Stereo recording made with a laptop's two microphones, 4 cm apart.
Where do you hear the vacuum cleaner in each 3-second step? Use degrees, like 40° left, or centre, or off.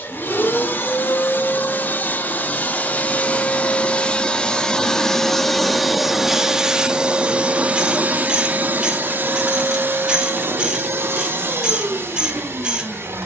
40° left, 20° left, 30° right, 60° right, 70° right.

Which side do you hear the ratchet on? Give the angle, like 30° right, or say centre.
20° right.